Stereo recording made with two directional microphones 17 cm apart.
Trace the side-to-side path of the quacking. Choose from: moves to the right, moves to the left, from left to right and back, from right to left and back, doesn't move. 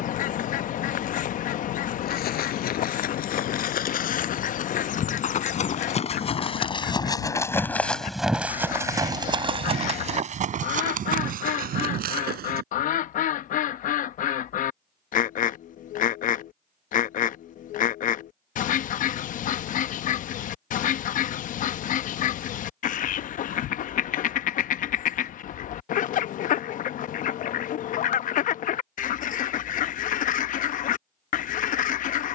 doesn't move.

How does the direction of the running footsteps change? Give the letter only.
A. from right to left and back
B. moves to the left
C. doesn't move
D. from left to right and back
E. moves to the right
E.